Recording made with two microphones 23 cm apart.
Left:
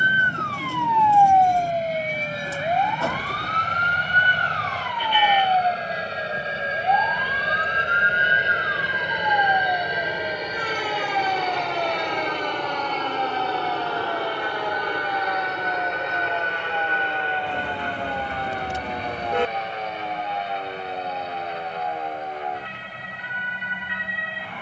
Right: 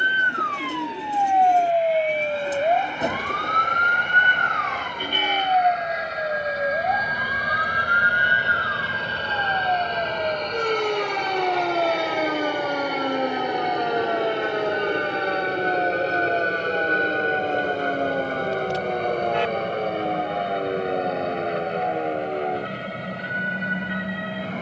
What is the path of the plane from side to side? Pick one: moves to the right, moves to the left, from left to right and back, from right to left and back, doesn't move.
moves to the right.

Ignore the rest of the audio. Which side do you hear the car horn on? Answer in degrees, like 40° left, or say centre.
50° left.